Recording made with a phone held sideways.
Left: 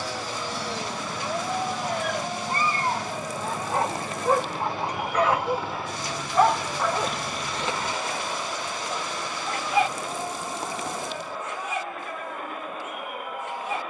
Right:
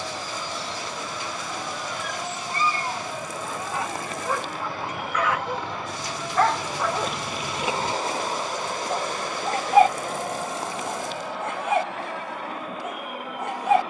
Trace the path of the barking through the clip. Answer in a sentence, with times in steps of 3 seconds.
You can hear the barking on the left from 0 s, in the centre from 6 s and on the right from 9 s.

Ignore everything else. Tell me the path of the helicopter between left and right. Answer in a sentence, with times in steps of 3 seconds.
In this clip you hear the helicopter on the left from 0 s and on the right from 6 s.